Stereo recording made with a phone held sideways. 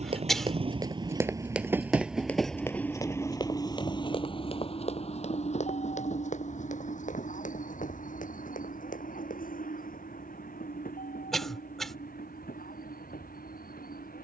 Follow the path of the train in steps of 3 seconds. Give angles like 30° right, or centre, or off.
20° right, 30° left, 60° left, 60° left, 70° left.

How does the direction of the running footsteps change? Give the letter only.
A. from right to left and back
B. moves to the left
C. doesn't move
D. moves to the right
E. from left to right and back
B.